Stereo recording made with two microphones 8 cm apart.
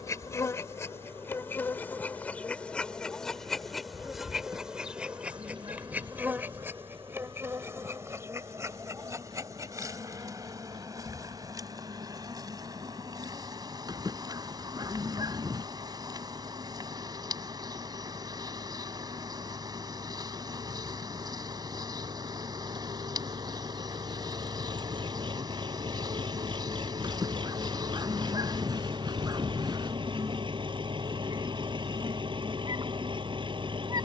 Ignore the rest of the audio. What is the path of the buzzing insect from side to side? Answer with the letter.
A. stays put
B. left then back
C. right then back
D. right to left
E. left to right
E.